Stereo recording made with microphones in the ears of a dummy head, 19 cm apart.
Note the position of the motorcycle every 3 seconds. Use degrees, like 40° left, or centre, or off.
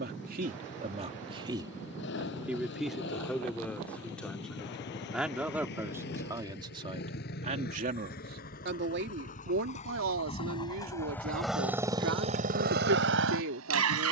60° left, 50° left, 50° left, 20° left, 60° right.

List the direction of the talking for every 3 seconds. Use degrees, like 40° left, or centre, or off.
20° right, centre, 30° right, 70° right, 70° right.